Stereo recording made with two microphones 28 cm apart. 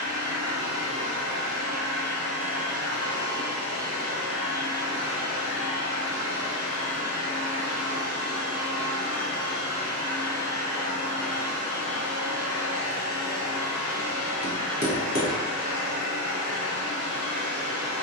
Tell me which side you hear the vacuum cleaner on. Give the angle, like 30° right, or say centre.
60° right.